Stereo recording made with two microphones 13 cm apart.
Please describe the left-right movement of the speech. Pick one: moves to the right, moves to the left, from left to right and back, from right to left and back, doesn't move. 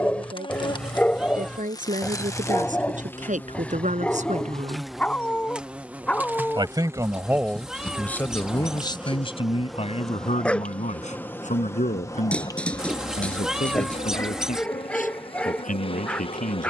moves to the left.